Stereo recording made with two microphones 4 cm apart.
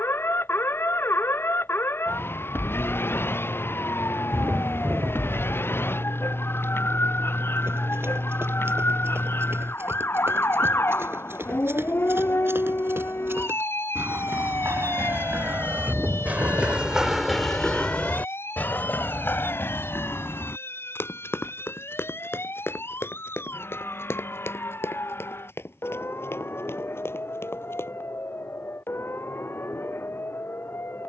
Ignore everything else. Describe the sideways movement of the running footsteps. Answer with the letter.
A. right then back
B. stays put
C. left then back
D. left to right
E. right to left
E.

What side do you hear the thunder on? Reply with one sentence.
You can hear the thunder on the right.